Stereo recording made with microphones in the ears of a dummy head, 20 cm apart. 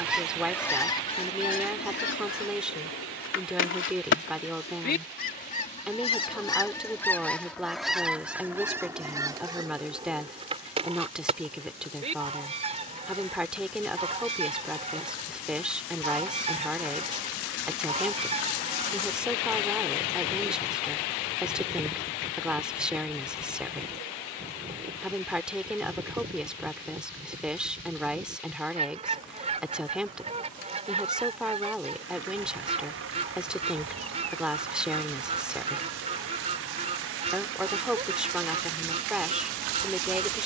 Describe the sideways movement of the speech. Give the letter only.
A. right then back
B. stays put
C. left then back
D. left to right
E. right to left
B.